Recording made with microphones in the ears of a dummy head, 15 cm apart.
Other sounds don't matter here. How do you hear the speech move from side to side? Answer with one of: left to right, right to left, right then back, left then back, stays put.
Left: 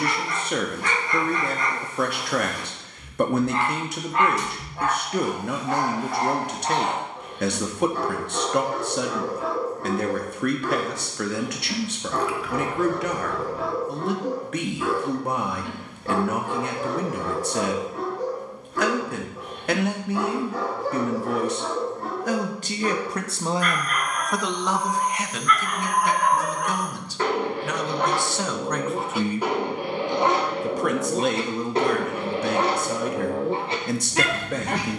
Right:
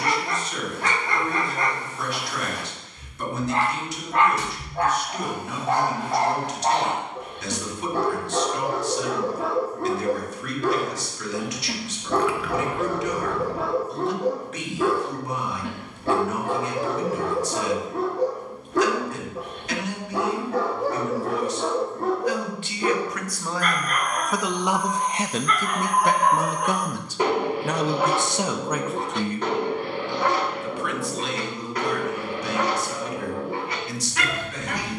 right then back.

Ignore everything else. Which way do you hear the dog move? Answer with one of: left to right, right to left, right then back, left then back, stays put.
right to left.